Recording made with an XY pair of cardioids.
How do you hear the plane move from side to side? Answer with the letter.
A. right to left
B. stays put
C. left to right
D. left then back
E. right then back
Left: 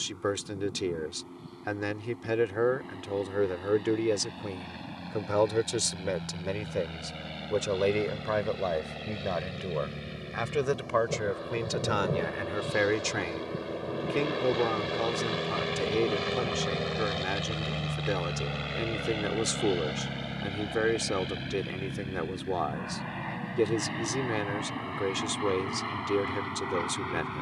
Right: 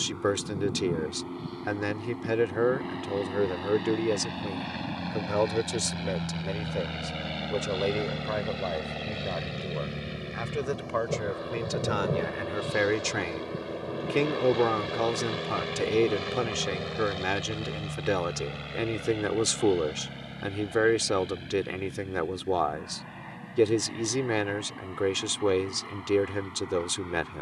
A.